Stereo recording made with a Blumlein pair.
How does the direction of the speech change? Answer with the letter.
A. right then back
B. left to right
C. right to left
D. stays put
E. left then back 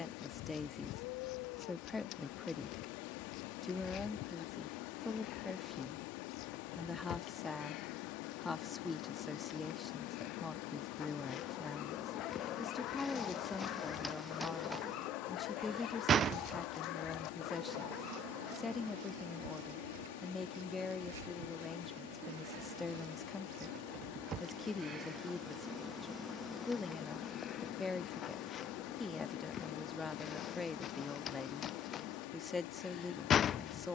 D.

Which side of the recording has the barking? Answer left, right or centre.
left.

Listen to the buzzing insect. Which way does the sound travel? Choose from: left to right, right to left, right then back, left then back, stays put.
right then back.